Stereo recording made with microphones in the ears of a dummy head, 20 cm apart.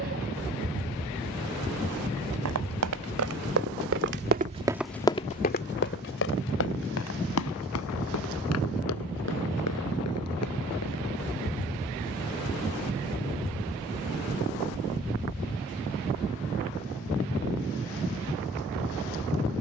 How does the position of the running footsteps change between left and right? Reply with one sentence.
You can hear the running footsteps move from right to left.